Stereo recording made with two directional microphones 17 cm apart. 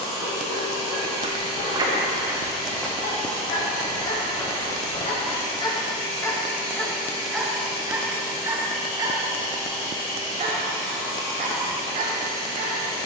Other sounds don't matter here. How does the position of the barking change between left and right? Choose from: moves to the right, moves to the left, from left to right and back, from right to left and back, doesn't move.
moves to the right.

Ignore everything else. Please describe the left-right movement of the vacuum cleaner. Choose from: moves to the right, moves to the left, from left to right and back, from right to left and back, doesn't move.
doesn't move.